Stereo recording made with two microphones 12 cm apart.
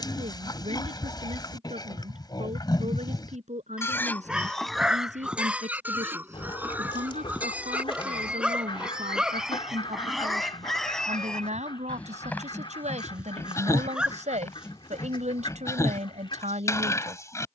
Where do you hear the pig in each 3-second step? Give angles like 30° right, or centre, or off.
40° left, 10° left, 10° right, centre, 20° left, 30° left.